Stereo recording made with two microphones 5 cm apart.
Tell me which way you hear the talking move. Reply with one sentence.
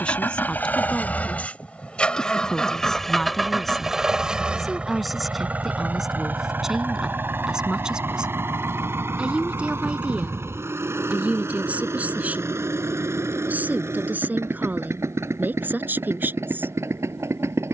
In this clip you hear the talking travel towards the right.